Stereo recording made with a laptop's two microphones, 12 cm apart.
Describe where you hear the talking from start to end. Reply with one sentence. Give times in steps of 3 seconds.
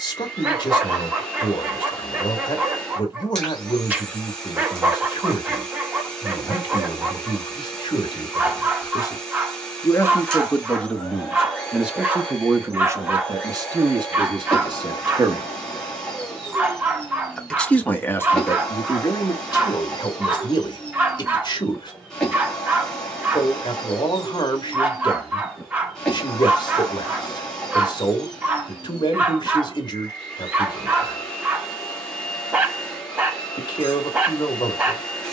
In this clip you hear the talking on the left from 0 s, in the centre from 9 s, on the right from 12 s, in the centre from 15 s and on the left from 18 s.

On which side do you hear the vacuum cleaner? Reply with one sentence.
You can hear the vacuum cleaner in the centre.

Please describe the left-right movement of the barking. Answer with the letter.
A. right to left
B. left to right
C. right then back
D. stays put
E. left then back
D.